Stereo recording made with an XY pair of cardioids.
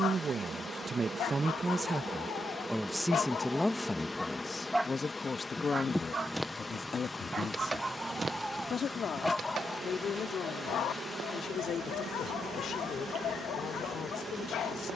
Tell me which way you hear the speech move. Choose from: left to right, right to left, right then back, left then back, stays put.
right to left.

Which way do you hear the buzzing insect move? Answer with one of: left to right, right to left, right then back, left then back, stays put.
left then back.